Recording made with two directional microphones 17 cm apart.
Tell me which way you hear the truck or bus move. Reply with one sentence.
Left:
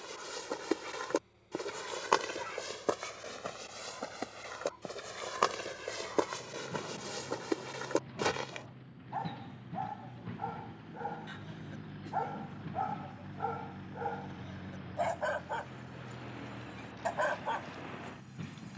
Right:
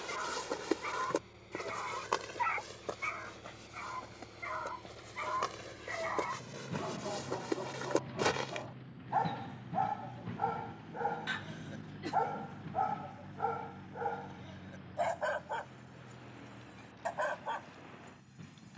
In this clip you hear the truck or bus travel towards the left.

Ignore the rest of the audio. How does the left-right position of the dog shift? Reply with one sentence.
You can hear the dog move from right to left.